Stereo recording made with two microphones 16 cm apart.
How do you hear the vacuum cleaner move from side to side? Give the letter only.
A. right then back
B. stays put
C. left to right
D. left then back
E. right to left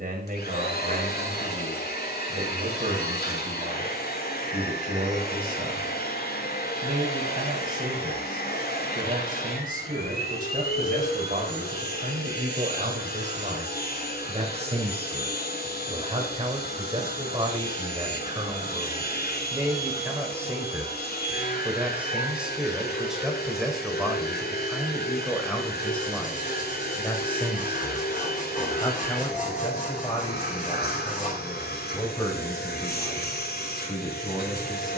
B.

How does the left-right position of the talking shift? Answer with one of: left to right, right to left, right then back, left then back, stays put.
right to left.